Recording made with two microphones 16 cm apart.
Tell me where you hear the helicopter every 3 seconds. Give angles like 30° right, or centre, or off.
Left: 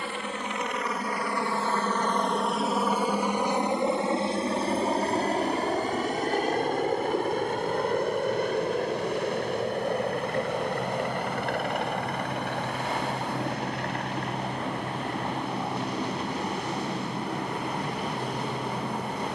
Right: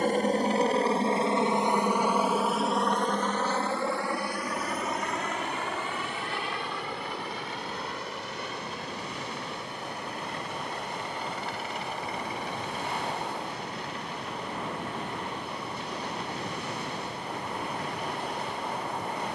20° right, 20° left, 50° left, 50° left, 60° left, 60° left, 60° left.